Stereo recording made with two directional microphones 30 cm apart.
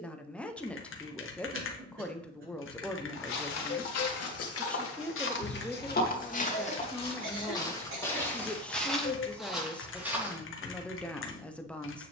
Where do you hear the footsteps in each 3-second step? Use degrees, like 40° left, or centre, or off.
off, 50° left, 10° left, centre.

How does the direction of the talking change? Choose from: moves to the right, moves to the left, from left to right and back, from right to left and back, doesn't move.
doesn't move.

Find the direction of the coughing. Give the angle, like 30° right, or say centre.
40° right.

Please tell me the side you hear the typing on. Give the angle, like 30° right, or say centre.
40° left.